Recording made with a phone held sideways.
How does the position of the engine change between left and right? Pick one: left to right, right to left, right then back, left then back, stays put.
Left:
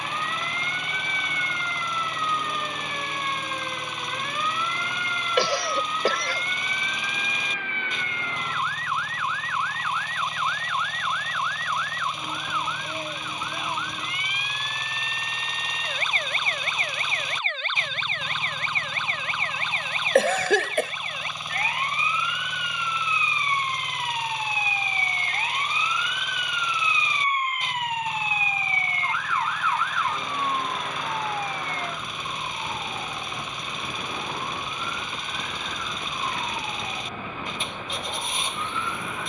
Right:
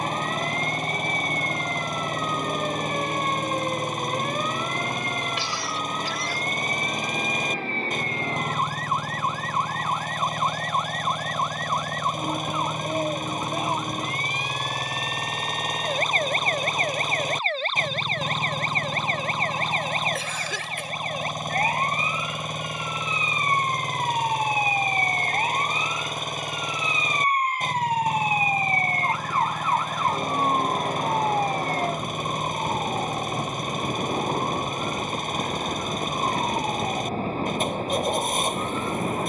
stays put.